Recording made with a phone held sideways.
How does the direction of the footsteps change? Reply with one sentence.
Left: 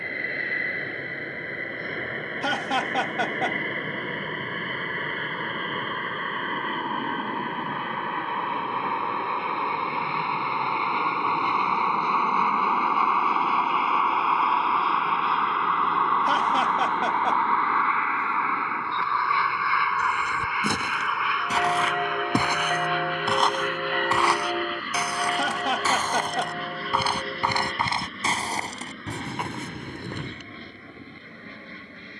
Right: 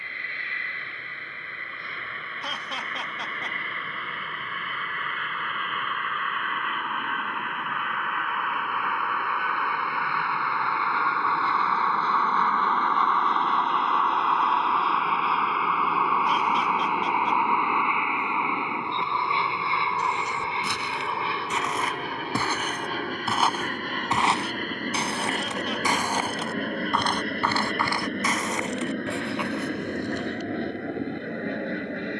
In this clip you hear the footsteps move from left to right and back again.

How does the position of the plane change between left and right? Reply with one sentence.
You can hear the plane travel towards the right.